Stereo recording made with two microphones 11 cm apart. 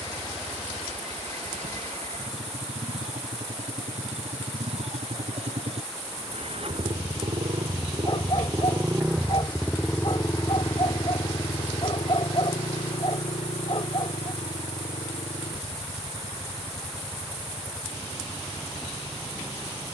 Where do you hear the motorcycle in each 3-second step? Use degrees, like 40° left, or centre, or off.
80° right, 70° right, 50° right, 20° left, 60° left, 70° left, 80° left.